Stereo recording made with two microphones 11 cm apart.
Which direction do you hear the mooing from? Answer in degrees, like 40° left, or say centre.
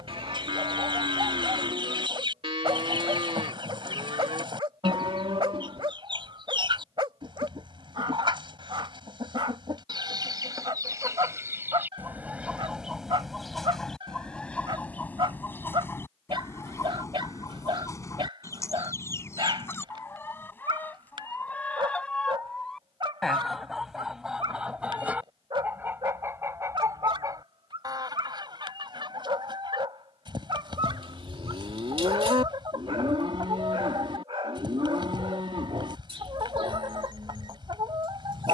50° right.